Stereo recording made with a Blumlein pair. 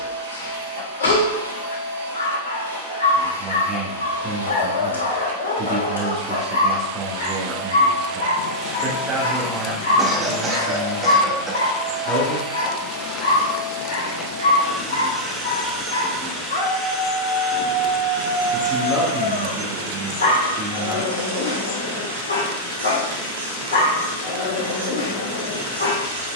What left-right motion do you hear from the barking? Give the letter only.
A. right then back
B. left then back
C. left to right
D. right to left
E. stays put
E.